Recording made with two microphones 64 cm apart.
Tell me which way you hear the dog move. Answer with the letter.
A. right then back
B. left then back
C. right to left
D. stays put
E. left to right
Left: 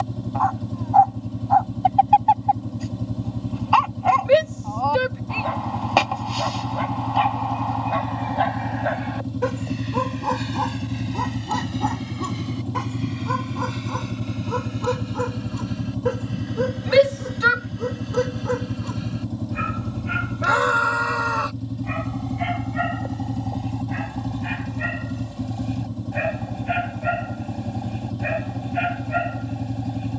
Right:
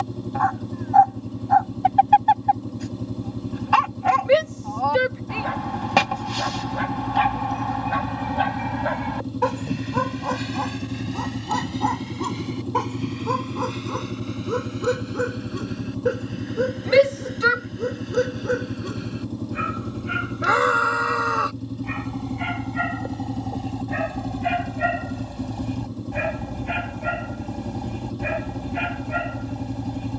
B.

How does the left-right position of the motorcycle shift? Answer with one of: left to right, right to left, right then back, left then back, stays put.
stays put.